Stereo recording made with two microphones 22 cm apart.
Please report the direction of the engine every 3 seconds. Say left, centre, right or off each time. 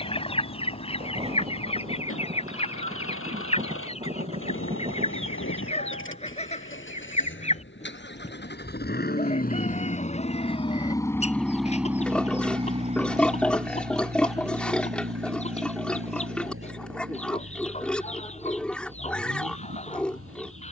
left, left, left, left, right, right, right.